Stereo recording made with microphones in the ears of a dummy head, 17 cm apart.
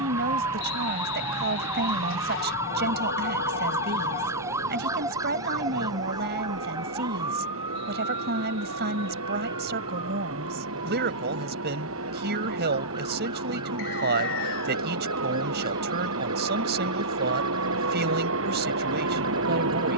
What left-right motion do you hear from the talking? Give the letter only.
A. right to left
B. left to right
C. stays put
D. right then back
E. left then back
C.